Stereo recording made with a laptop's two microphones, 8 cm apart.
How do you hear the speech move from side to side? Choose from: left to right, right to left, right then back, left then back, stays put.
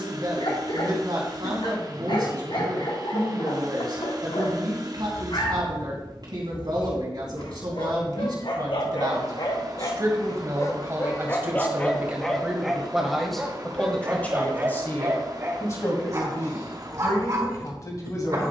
right to left.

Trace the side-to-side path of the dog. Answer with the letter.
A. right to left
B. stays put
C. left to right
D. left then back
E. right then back
C.